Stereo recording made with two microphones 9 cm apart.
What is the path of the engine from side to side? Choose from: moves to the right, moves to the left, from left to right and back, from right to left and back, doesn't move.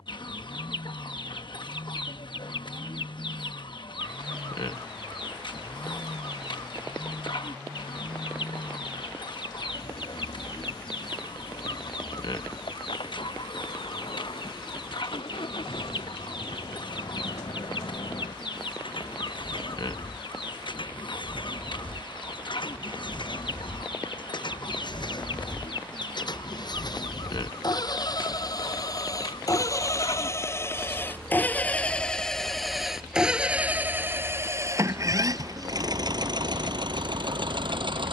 moves to the right.